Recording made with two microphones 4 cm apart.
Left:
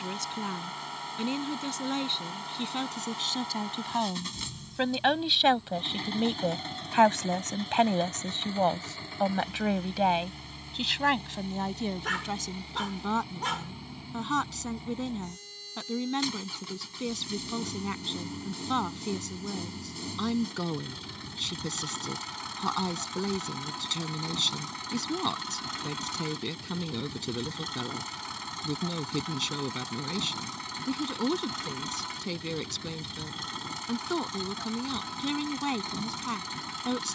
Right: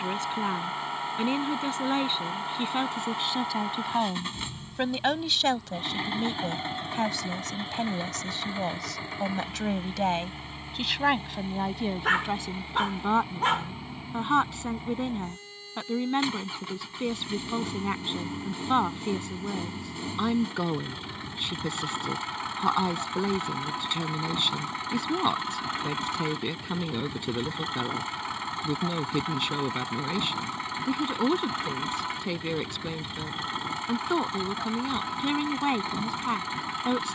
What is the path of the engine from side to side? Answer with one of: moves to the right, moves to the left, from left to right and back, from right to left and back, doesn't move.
doesn't move.